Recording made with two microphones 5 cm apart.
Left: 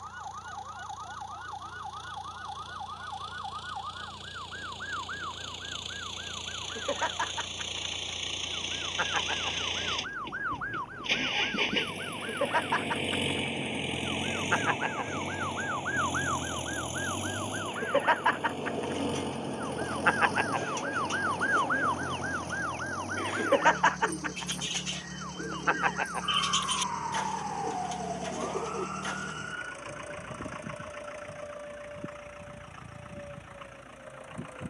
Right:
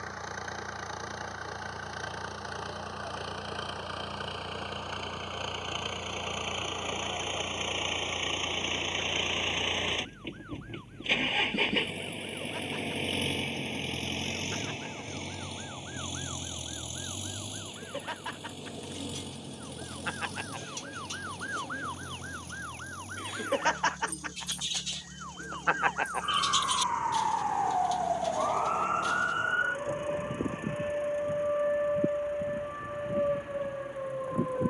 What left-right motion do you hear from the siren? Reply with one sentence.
In this clip you hear the siren move from left to right.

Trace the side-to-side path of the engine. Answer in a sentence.
You can hear the engine move from right to left.